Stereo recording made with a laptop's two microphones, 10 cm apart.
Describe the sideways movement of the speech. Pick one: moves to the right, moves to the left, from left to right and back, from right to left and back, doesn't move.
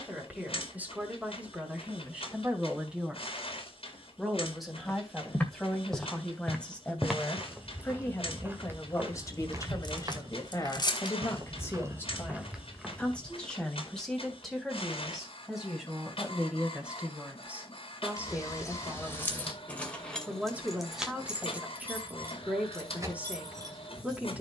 from right to left and back.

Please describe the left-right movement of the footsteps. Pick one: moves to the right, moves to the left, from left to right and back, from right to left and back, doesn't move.
from left to right and back.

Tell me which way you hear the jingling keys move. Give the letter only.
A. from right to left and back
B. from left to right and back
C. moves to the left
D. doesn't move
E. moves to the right
E.